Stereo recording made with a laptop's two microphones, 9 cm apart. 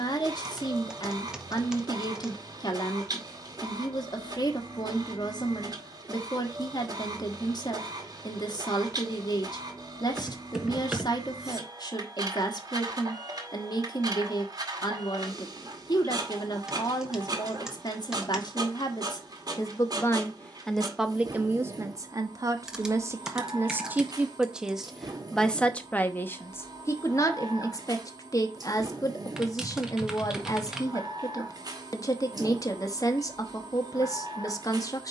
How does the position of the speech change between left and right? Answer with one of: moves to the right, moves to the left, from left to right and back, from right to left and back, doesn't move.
from left to right and back.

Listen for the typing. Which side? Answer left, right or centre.
centre.